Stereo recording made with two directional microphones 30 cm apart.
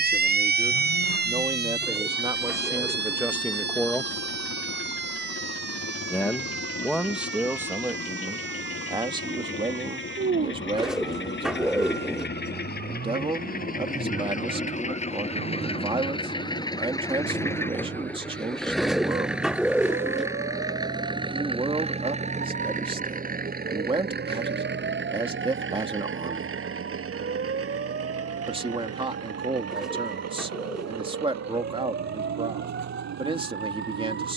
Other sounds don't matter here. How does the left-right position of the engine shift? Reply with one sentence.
You can hear the engine move from left to right.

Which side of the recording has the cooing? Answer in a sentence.
In this clip you hear the cooing in the centre.